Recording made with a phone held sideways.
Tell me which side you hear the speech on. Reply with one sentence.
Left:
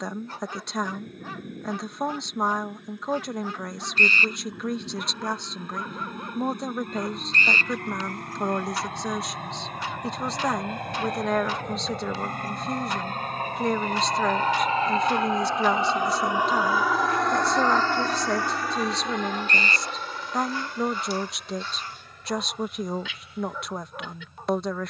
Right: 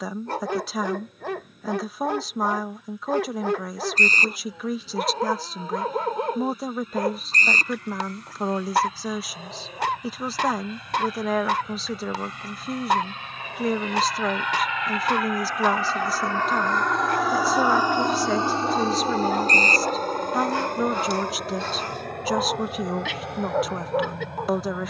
In this clip you hear the speech in the centre.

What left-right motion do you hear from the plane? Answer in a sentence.
You can hear the plane move to the right.